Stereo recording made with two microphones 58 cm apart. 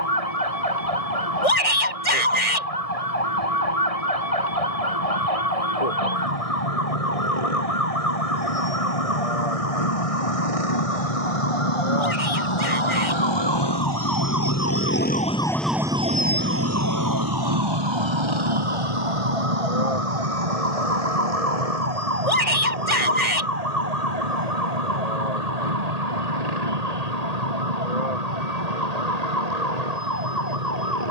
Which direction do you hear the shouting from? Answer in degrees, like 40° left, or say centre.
70° left.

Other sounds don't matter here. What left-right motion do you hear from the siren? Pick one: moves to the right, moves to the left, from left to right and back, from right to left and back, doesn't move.
moves to the right.